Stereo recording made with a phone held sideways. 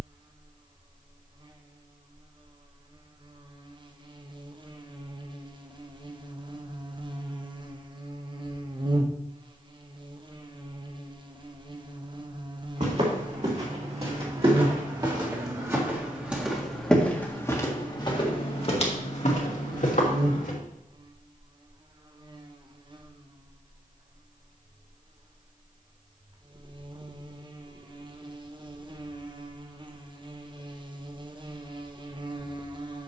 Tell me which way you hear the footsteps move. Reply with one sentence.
You can hear the footsteps travel towards the left.